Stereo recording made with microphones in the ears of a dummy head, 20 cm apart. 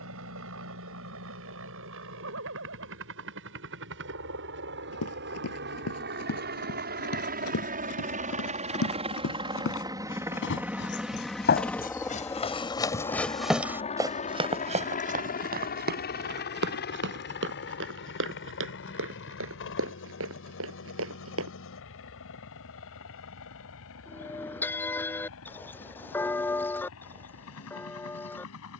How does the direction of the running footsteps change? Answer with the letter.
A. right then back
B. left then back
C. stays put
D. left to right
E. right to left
D.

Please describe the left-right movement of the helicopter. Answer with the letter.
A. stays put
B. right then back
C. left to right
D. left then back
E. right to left
E.